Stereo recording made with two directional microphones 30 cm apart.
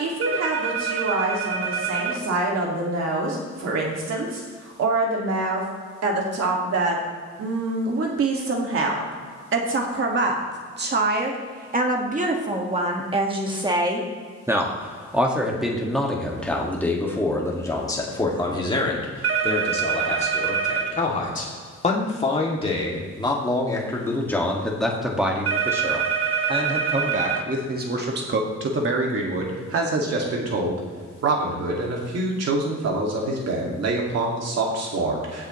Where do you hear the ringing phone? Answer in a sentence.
You can hear the ringing phone on the right.